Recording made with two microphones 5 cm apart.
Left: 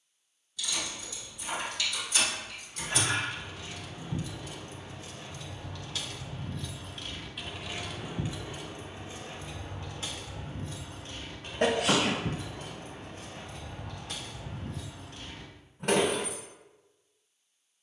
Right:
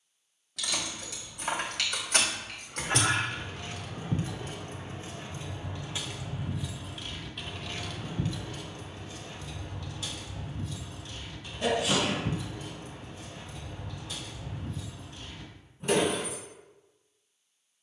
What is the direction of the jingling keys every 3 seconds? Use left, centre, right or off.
right, right, centre, left, left, left.